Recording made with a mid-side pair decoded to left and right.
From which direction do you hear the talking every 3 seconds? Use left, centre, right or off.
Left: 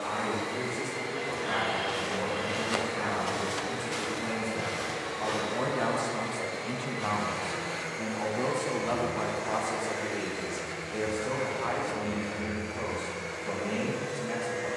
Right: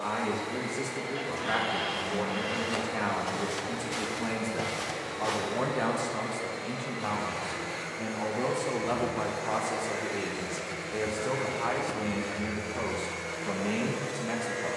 right, right, centre, right, right.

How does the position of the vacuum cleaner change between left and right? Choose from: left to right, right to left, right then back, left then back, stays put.
left to right.